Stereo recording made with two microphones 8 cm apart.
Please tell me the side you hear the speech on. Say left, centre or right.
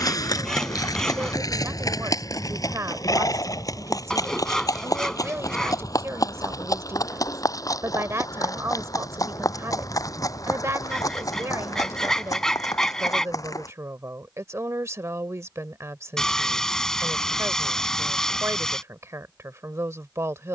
right.